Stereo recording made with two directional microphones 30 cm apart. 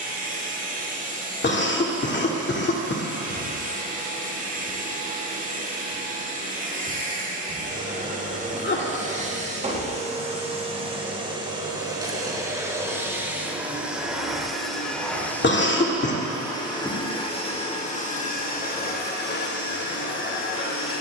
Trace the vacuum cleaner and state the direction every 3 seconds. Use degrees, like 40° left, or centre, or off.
30° right, 30° right, 30° right, 20° right, 10° right, 10° left, 30° left.